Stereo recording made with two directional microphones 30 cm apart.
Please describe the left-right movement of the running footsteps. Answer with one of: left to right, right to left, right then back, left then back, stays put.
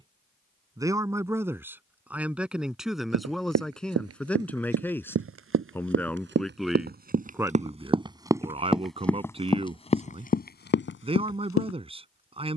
right to left.